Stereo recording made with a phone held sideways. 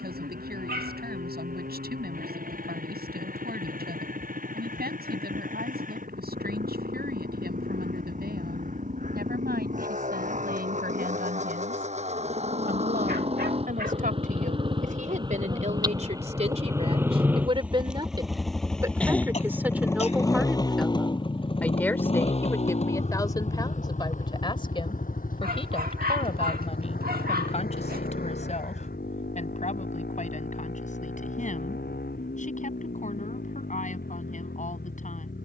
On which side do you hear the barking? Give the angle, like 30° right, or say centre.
70° right.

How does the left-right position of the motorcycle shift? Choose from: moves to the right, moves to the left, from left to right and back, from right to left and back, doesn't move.
moves to the left.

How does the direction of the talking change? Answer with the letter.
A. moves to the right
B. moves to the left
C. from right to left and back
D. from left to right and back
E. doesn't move
B.